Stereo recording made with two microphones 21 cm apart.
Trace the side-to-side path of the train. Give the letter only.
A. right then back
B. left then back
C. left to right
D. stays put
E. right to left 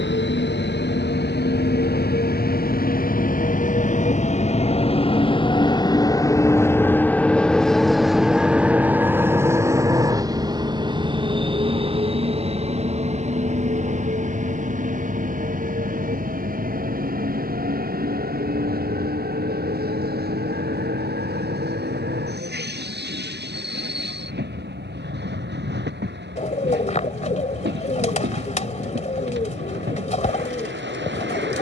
C.